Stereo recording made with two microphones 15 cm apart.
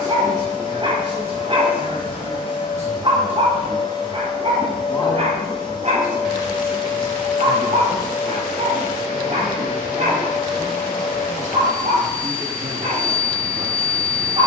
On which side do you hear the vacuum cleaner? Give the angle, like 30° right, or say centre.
30° left.